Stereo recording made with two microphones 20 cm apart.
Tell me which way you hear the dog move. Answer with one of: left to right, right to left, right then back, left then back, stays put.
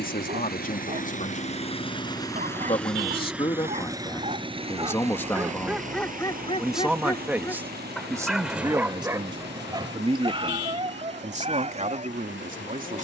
left then back.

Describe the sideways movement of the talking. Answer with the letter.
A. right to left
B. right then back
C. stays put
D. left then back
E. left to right
E.